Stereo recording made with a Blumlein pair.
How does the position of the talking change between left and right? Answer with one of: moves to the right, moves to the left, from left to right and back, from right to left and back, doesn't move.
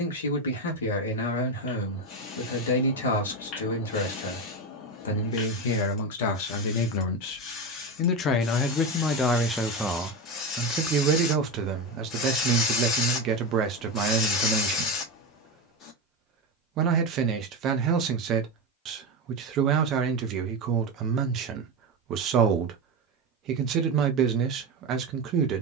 moves to the right.